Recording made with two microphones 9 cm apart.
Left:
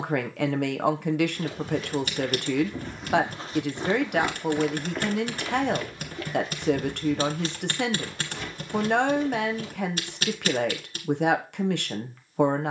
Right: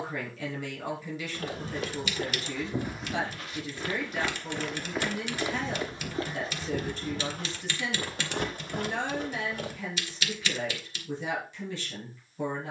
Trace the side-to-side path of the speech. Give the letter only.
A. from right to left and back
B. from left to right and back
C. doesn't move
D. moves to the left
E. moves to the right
C.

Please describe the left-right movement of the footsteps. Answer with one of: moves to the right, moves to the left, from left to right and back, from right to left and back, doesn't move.
from right to left and back.